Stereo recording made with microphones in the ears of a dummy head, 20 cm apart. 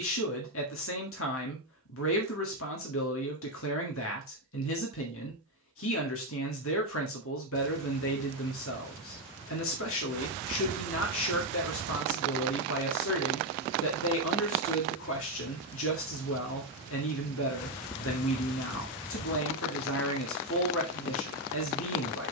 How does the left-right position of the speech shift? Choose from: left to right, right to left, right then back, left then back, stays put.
stays put.